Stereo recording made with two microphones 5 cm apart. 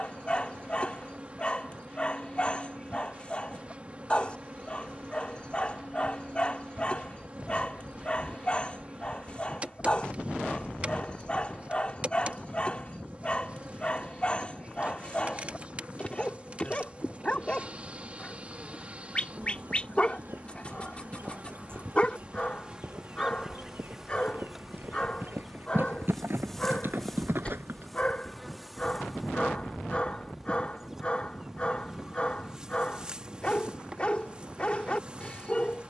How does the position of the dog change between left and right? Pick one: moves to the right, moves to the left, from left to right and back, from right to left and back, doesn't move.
doesn't move.